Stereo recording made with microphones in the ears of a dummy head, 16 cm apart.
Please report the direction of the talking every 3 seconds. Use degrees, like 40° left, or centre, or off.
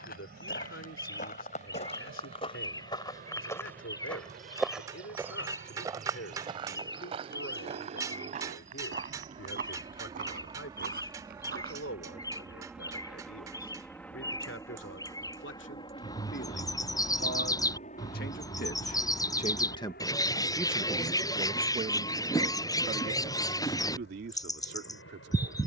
80° left, 80° left, 80° left, 80° left, 80° left, 70° left, 30° left, 40° right, 60° right.